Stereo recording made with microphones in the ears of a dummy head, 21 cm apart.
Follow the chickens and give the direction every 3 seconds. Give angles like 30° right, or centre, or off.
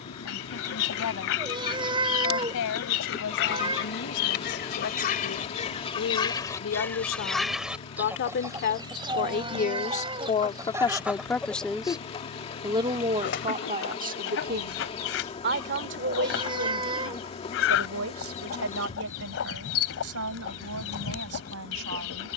60° left, 40° left, centre, 10° right, 50° left, 60° left, 60° left, 60° left.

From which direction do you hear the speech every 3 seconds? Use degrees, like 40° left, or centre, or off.
80° left, 70° left, 60° left, 20° left, 30° right, 60° right, 70° right, 70° right.